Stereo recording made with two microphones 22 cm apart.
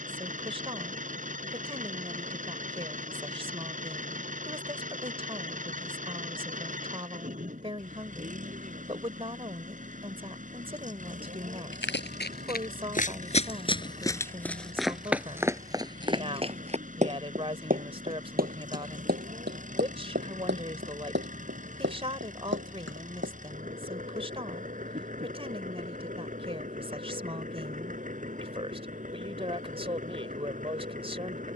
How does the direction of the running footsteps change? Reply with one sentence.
In this clip you hear the running footsteps move to the right.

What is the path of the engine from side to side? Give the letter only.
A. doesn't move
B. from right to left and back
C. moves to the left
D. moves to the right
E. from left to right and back
A.